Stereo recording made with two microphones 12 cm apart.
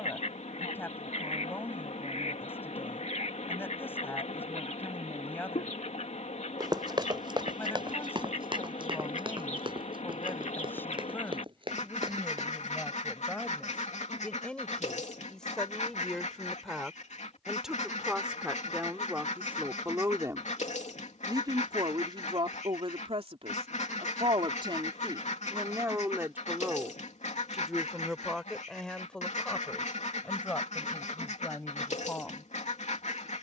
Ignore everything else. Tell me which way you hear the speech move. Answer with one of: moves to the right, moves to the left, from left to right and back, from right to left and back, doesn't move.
from left to right and back.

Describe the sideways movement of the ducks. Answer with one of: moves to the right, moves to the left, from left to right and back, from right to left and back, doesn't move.
doesn't move.